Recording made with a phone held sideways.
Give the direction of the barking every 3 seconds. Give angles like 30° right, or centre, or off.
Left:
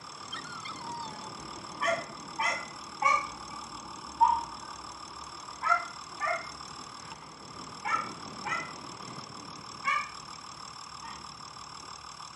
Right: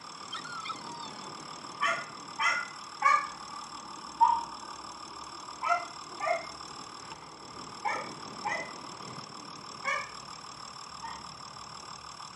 40° left, centre, 30° right, 50° right.